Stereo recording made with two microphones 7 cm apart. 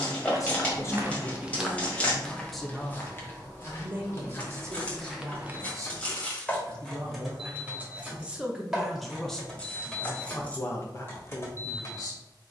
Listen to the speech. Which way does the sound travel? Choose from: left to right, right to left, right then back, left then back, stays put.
right then back.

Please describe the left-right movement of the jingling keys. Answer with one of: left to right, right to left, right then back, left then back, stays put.
right then back.